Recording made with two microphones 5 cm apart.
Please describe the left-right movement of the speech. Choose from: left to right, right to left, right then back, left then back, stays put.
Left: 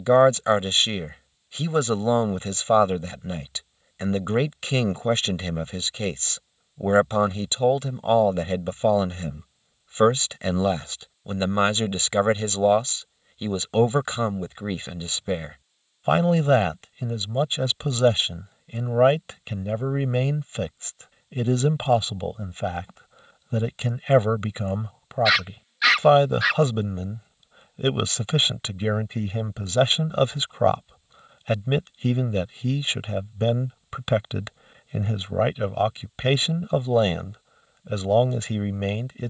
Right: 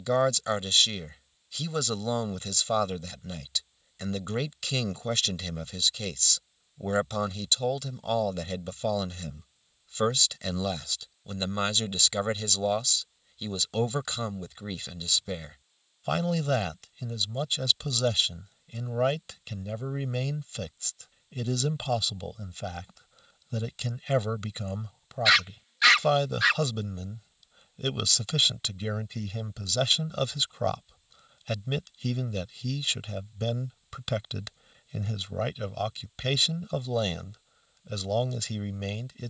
stays put.